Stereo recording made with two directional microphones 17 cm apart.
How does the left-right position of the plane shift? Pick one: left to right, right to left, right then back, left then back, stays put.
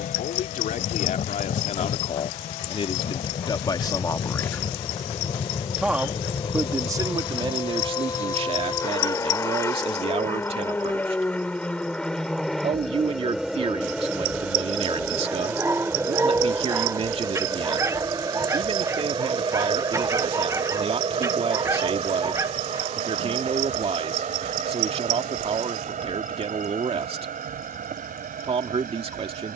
left to right.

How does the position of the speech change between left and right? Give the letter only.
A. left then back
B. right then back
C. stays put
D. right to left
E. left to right
E.